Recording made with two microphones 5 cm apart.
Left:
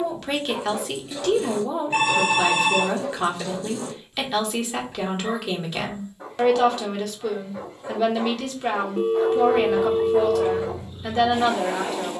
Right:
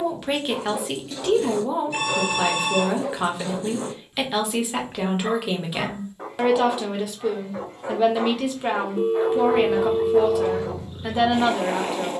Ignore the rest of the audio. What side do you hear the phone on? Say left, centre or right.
left.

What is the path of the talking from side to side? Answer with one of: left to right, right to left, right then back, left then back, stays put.
stays put.